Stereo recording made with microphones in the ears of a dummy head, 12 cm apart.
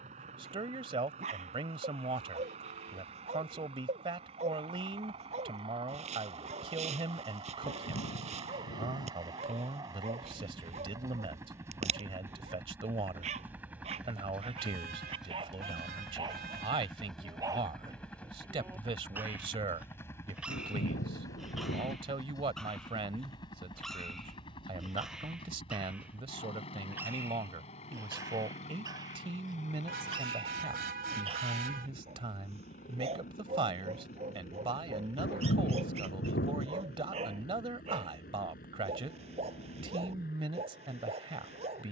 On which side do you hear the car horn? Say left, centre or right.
right.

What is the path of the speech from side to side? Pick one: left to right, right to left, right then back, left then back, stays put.
stays put.